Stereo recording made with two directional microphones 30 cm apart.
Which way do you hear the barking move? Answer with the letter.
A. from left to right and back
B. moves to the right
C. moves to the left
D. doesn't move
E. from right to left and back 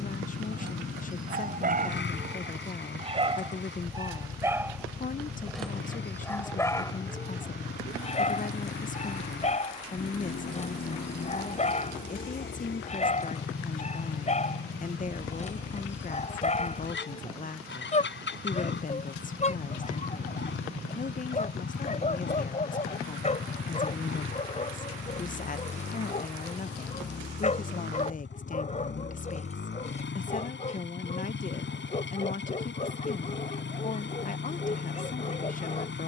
C.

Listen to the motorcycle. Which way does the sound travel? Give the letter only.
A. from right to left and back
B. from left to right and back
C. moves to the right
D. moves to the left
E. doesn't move
E.